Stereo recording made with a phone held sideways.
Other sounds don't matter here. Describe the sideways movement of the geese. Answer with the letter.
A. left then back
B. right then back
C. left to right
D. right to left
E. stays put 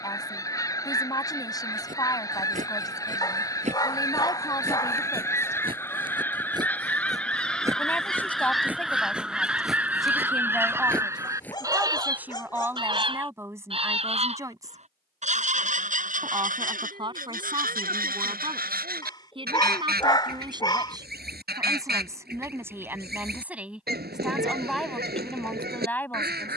C.